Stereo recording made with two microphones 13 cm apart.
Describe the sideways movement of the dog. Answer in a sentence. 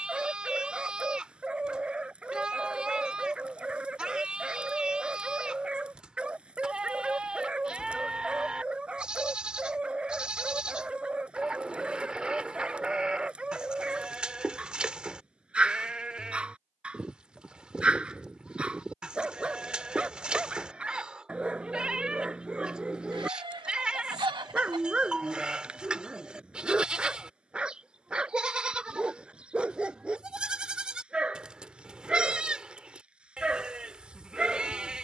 You can hear the dog stay put.